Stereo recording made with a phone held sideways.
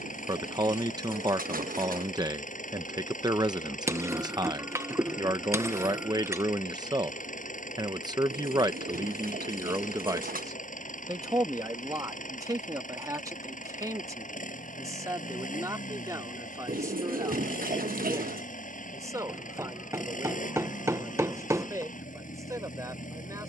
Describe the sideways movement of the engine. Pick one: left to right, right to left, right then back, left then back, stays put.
stays put.